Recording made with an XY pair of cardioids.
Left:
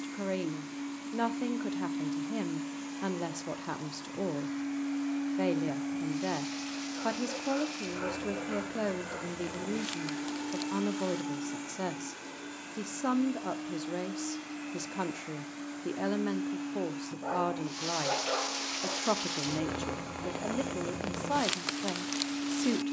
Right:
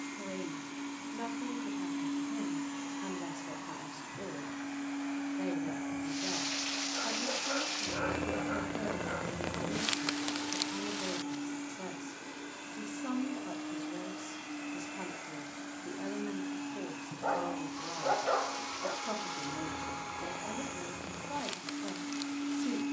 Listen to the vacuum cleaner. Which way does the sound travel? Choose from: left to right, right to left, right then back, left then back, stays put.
left then back.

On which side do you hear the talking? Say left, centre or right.
left.